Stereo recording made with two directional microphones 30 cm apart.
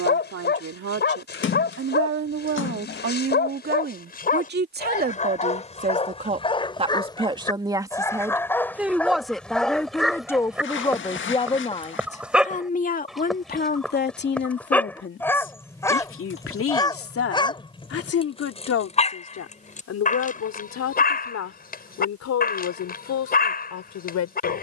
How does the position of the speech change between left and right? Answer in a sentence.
In this clip you hear the speech travel towards the left.